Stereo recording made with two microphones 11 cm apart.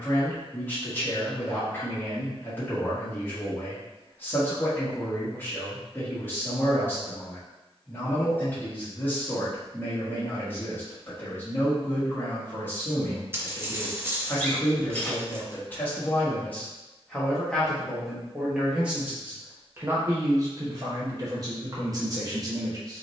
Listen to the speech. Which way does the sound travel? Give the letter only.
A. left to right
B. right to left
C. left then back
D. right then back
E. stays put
A.